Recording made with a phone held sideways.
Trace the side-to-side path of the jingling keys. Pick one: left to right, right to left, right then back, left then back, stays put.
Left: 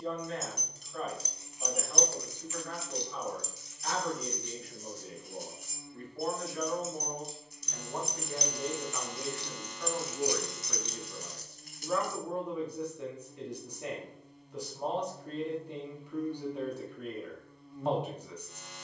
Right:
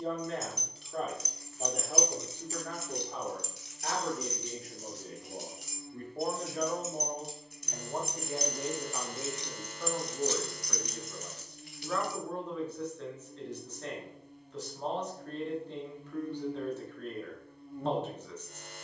right then back.